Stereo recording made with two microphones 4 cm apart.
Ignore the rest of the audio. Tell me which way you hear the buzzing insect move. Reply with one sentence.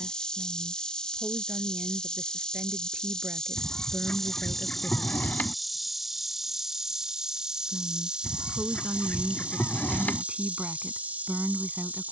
In this clip you hear the buzzing insect move from left to right.